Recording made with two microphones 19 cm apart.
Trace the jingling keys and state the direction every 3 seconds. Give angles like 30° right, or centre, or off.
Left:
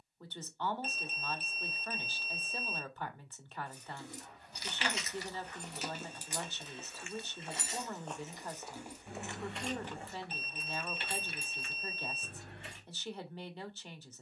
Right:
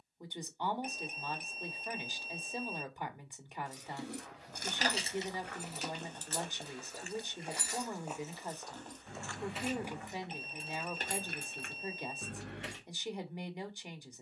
off, 40° right, 20° left, 30° right, 70° right.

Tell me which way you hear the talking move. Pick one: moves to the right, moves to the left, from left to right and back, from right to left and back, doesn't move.
doesn't move.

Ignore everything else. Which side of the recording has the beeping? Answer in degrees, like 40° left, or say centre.
20° right.